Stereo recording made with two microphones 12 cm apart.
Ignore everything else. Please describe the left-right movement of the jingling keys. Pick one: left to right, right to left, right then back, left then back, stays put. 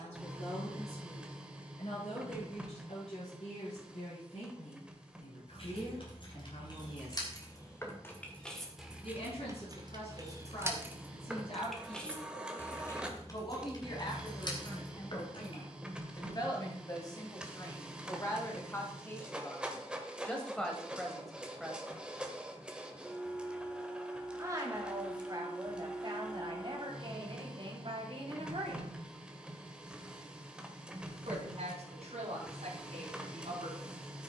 right then back.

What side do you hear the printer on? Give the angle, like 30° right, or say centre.
10° right.